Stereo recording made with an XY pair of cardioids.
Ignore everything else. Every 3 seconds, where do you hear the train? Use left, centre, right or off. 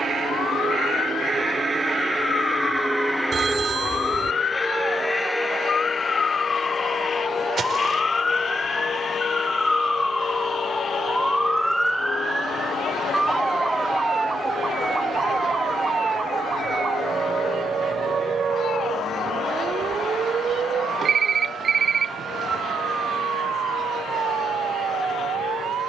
right, centre, left, left, left, left, left, left, left.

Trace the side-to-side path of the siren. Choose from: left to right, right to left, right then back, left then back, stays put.
left to right.